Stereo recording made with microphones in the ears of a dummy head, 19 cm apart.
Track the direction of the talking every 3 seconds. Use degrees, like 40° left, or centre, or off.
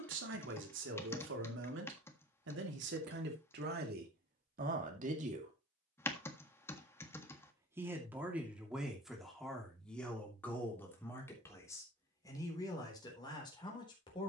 60° right, 50° right, 10° right, 10° left, 20° left.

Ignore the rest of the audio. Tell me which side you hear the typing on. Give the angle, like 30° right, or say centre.
10° left.